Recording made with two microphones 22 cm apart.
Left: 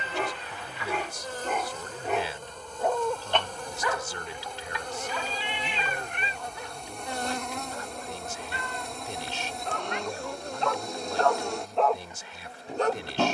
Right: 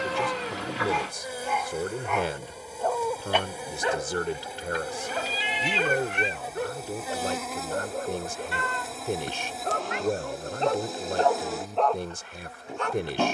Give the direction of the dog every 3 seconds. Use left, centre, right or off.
left, right, right, right, left.